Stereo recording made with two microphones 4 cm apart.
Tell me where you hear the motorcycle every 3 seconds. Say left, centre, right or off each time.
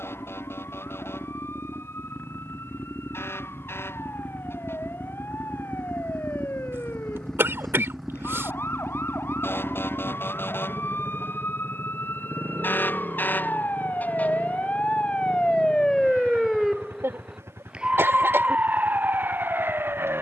left, left, centre, right, right, right, right.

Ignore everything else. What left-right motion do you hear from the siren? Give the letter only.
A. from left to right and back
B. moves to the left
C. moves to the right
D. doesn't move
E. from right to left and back
C.